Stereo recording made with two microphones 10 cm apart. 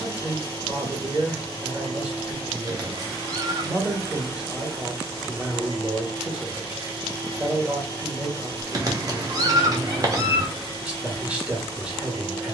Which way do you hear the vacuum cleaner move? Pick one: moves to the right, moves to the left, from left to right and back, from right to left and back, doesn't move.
doesn't move.